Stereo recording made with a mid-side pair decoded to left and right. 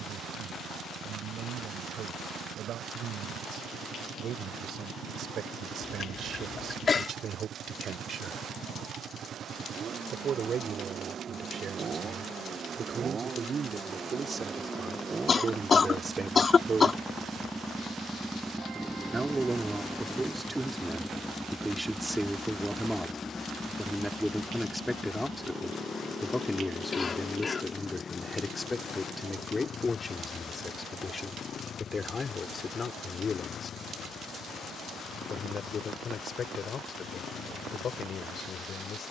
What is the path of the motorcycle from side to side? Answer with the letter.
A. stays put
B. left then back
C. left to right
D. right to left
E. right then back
D.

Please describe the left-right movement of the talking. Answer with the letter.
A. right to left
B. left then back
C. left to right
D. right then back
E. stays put
A.